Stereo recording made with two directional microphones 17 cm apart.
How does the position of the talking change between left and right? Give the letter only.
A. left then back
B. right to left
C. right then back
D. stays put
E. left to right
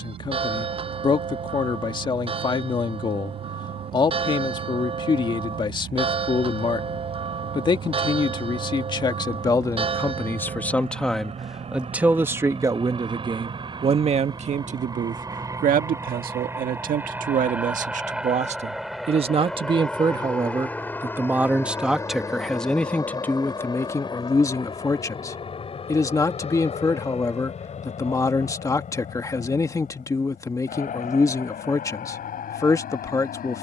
C.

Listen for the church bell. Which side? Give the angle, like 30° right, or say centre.
30° right.